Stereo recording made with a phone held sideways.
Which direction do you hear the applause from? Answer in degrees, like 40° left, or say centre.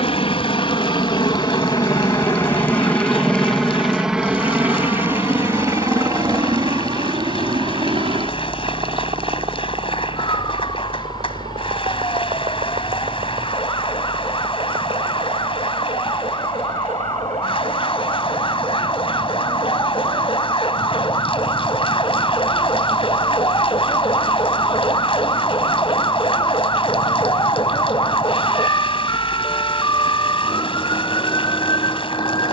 40° left.